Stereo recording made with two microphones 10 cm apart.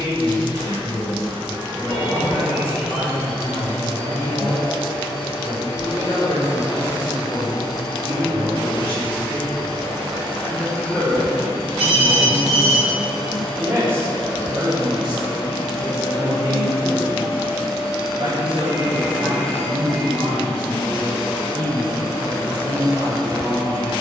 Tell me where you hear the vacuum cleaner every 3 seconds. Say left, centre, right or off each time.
right, right, right, right, right, right, centre, right.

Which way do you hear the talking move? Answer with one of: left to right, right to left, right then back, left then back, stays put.
left to right.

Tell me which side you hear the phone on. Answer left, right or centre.
centre.